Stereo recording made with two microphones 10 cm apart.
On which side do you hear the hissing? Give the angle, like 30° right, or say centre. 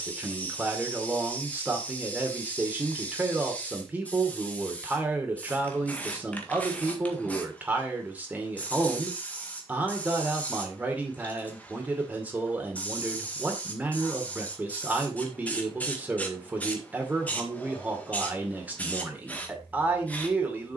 10° left.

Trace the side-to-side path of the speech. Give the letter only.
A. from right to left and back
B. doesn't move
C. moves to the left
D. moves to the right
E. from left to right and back
B.